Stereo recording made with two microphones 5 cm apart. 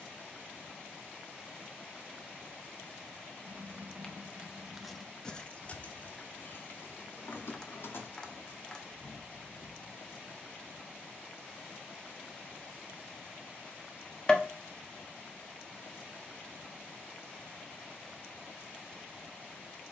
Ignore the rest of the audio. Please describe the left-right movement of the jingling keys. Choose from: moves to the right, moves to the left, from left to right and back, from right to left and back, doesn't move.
moves to the left.